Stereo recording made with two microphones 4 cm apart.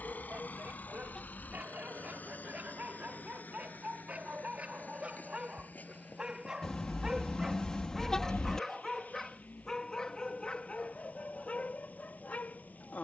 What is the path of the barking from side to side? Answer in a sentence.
In this clip you hear the barking travel towards the left.